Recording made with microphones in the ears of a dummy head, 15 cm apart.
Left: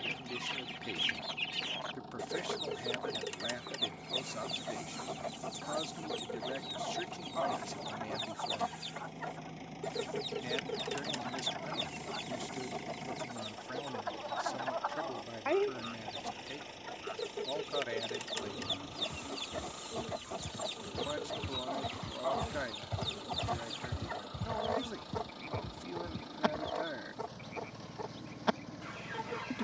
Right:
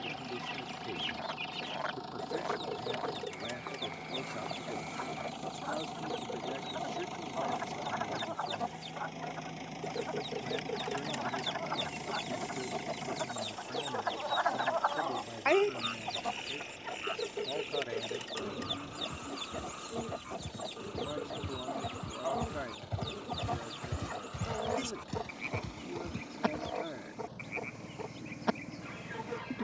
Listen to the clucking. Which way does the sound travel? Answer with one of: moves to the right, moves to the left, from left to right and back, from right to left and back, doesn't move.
from left to right and back.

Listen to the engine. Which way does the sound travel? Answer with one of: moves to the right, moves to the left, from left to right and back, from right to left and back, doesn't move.
moves to the left.